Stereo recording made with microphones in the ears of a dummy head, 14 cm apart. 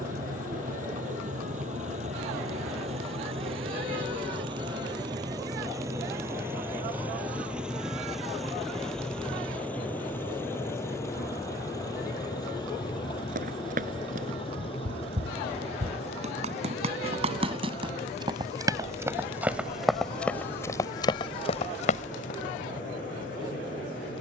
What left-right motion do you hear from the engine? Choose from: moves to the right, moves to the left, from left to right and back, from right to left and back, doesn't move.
moves to the left.